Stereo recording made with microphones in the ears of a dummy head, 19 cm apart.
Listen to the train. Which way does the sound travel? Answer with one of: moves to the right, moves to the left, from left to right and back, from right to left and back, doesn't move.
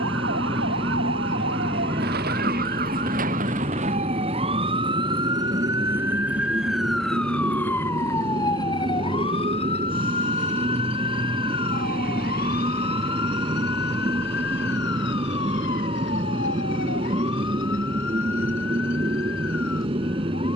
doesn't move.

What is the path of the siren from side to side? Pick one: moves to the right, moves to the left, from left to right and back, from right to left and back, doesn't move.
moves to the left.